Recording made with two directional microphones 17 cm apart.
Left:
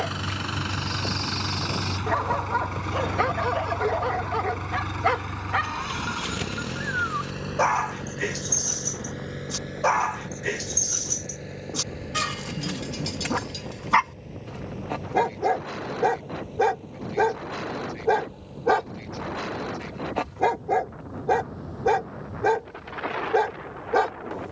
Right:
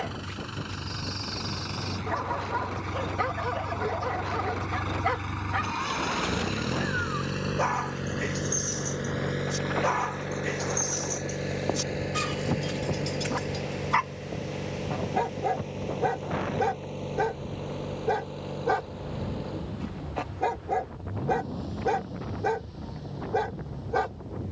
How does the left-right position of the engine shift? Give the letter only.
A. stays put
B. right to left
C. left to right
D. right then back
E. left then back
C.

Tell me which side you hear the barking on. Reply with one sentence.
You can hear the barking on the left.